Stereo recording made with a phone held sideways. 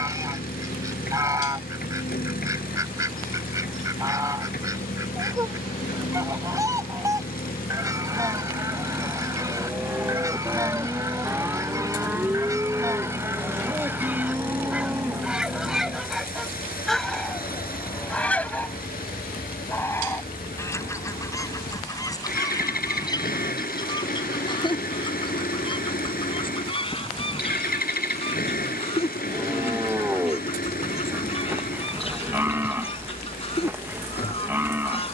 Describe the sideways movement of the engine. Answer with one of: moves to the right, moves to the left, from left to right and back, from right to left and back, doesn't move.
doesn't move.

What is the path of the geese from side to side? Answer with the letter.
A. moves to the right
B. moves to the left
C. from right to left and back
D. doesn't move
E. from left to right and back
B.